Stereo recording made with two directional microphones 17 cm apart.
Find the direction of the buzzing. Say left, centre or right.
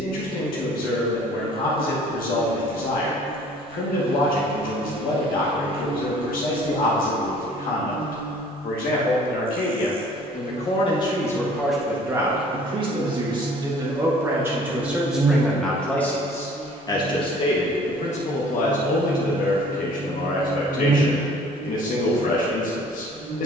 right.